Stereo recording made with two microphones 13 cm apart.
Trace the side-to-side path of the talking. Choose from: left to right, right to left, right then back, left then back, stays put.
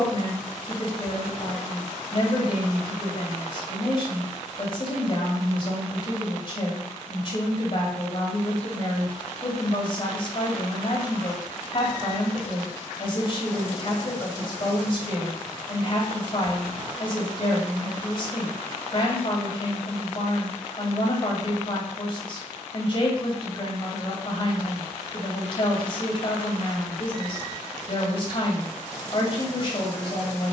stays put.